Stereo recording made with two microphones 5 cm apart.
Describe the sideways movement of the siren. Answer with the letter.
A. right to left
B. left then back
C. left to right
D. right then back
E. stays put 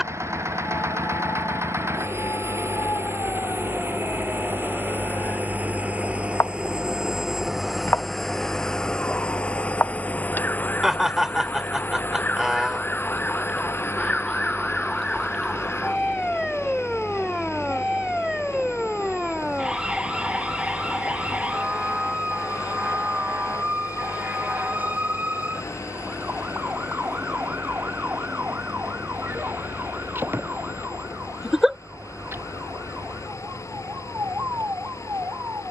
C.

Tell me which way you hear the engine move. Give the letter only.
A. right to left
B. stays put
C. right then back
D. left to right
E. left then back
A.